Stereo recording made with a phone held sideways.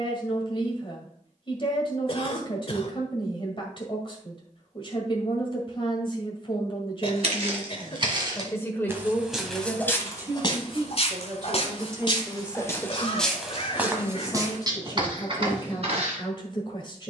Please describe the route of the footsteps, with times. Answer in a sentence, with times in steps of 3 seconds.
You can hear the footsteps not at all from 0 s, on the right from 6 s, on the left from 9 s, in the centre from 12 s and on the right from 15 s.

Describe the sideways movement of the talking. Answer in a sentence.
In this clip you hear the talking go right and come back.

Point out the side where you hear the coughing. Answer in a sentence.
In this clip you hear the coughing on the left.